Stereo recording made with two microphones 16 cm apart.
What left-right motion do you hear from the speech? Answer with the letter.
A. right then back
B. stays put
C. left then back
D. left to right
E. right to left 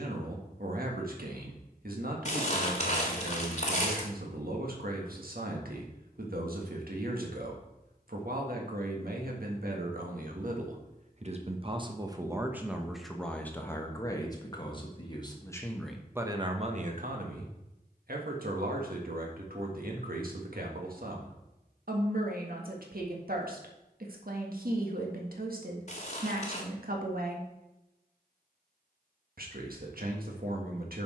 C.